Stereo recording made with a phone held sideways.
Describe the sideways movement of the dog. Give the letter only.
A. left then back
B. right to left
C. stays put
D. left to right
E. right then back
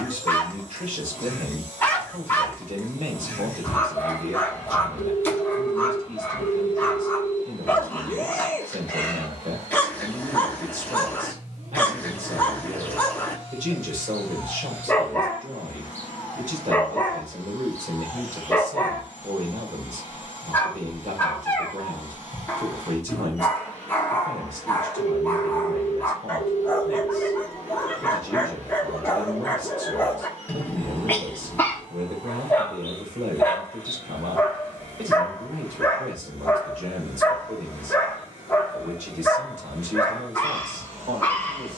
C.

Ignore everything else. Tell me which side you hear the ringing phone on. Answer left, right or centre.
right.